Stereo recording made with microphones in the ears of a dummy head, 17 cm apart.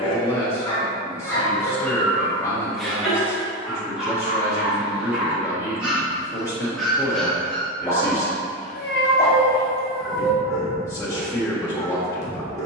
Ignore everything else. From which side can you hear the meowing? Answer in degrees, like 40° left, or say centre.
60° left.